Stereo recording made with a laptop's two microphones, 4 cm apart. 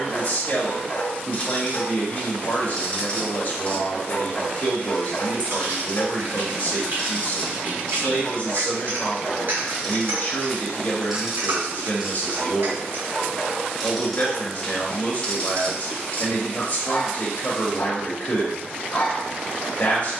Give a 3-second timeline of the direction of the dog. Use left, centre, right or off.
left, left, left, centre, centre, left, left.